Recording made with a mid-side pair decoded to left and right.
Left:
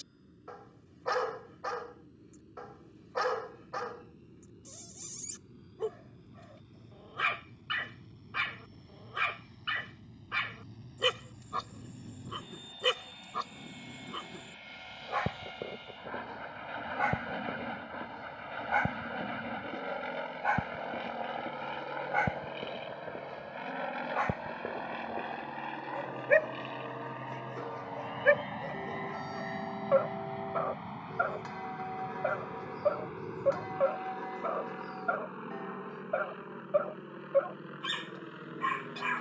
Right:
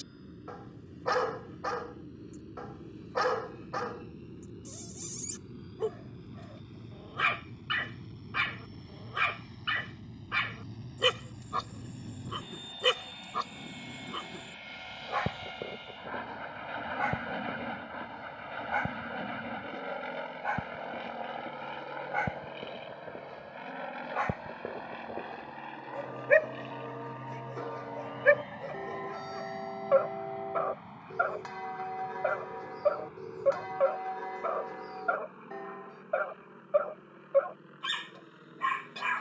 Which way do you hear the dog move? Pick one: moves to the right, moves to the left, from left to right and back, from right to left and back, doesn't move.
from right to left and back.